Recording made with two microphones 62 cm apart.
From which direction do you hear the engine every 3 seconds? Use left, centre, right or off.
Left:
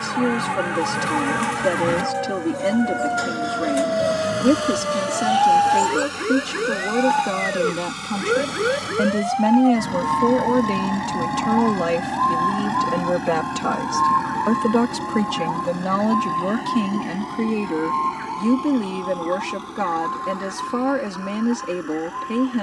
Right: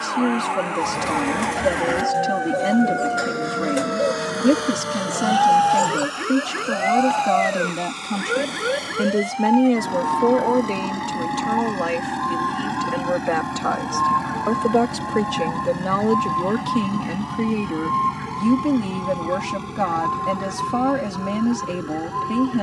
left, left, left, left, centre, right, right, right.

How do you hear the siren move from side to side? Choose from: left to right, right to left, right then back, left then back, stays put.
left to right.